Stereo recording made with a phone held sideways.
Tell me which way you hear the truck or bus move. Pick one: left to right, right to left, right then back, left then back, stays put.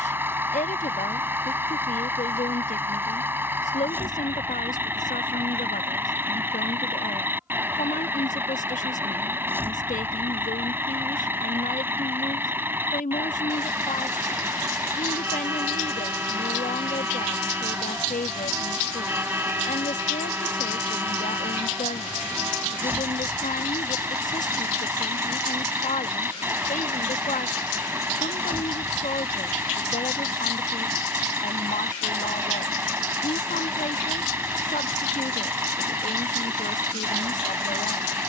stays put.